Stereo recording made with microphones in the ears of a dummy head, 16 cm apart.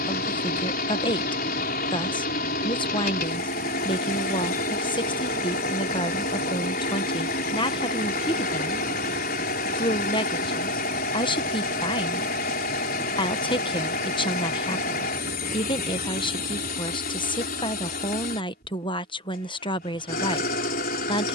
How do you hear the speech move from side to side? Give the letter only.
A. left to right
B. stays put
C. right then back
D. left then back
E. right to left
B.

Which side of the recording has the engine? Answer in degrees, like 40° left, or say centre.
60° left.